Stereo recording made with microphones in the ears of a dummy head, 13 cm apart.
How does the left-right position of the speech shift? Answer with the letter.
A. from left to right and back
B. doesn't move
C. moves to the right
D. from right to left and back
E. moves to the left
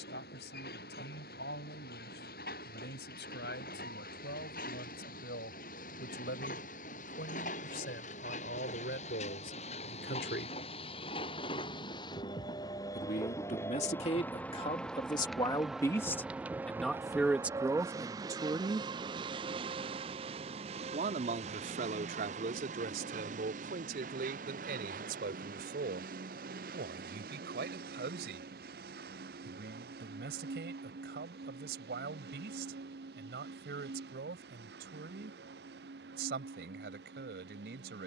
C.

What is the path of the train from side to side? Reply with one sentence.
In this clip you hear the train go from the left side to the right.